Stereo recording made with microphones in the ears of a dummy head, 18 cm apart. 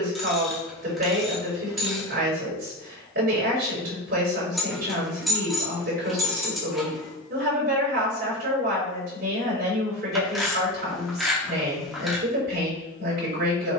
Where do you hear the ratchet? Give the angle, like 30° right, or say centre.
centre.